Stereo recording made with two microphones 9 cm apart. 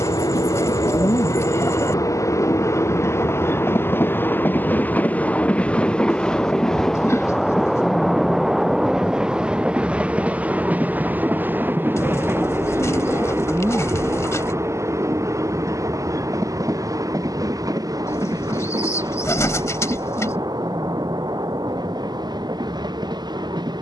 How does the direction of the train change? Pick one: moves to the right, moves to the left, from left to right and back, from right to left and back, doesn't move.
moves to the right.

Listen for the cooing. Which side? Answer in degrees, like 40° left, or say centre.
30° left.